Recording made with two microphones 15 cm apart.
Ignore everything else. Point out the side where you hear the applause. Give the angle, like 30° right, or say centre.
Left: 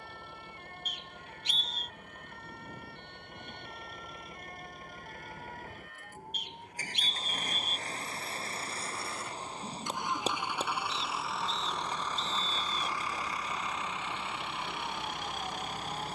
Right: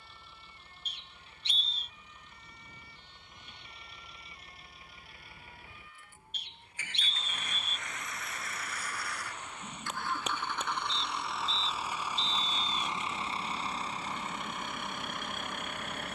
30° left.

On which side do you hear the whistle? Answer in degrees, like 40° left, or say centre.
30° right.